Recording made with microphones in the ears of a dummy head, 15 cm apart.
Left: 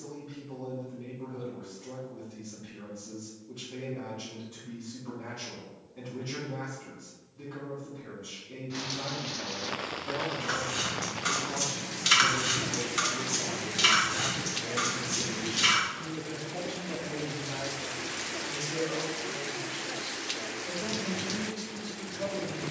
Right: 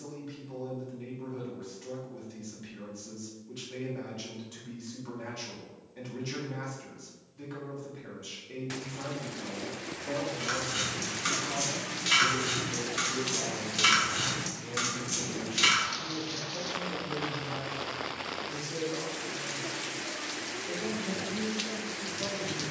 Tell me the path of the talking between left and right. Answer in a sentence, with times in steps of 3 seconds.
You can hear the talking on the right from 0 s, in the centre from 12 s and on the left from 15 s.